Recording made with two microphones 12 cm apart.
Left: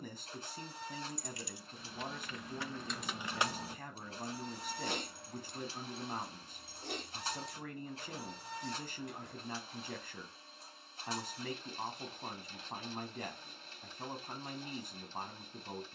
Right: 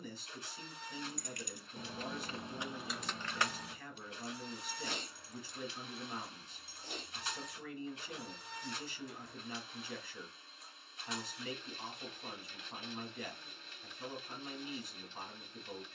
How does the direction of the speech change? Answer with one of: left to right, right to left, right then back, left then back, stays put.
stays put.